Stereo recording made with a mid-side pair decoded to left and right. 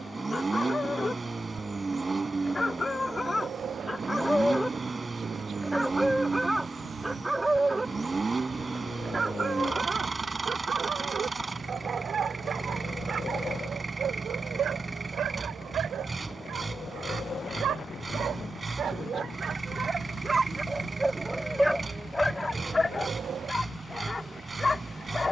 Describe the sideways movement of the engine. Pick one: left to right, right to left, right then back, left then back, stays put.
stays put.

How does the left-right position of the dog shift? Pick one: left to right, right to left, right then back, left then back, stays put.
right then back.